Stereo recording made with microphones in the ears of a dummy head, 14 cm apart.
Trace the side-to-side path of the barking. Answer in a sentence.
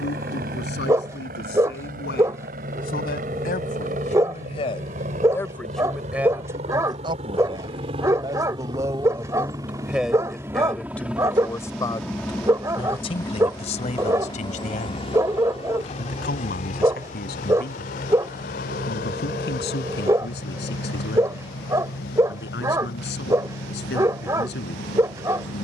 You can hear the barking stay in one place.